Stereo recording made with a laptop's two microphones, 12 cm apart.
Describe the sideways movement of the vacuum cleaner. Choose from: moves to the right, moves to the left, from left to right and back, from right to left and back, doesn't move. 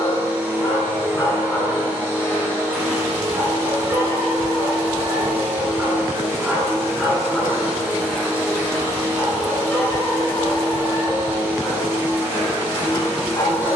doesn't move.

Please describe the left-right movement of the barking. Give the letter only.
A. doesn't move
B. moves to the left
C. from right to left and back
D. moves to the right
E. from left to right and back
E.